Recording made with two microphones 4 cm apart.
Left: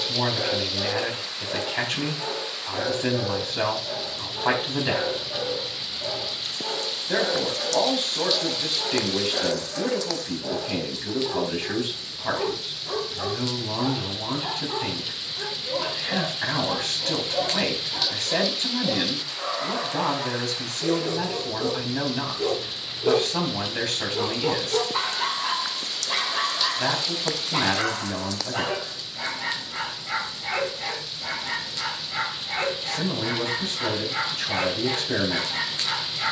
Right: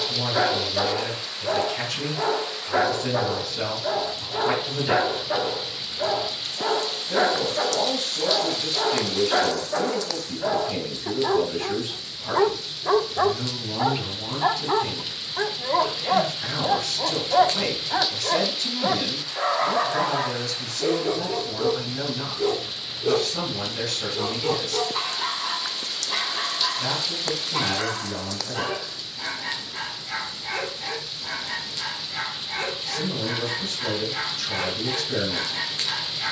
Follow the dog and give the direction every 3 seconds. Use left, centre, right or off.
right, right, right, right, right, right, right, centre, left, left, left, left.